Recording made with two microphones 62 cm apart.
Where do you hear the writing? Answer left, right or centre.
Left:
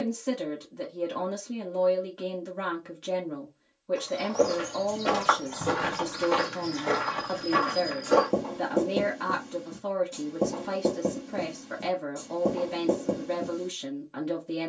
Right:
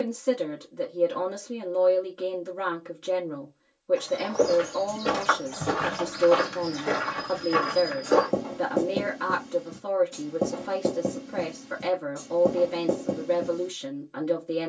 centre.